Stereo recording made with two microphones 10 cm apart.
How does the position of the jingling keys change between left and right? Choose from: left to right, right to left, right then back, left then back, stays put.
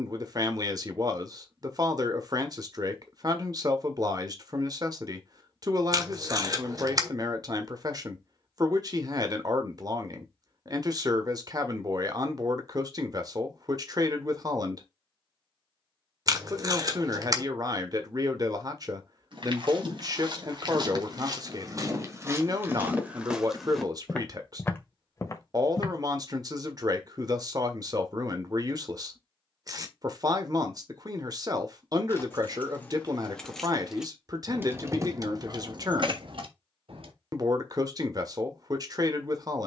left to right.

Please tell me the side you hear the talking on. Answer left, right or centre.
right.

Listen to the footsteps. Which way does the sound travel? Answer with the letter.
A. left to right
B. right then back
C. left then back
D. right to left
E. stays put
D.